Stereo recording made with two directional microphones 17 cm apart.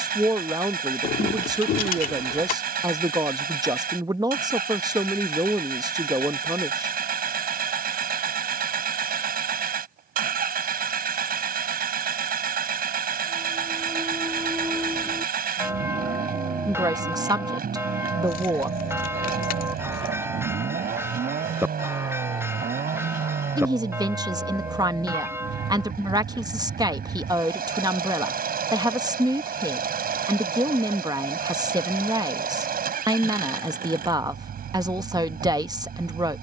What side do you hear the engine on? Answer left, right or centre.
right.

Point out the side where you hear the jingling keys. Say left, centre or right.
left.